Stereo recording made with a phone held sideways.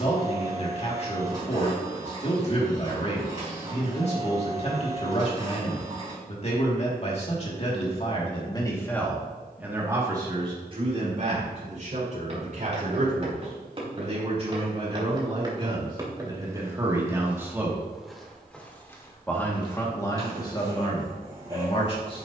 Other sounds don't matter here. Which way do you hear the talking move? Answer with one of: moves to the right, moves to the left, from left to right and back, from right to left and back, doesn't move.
from left to right and back.